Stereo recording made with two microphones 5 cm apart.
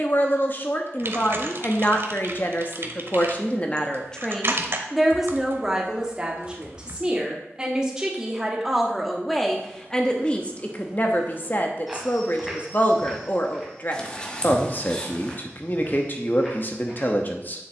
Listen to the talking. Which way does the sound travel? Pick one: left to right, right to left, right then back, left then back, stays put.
right then back.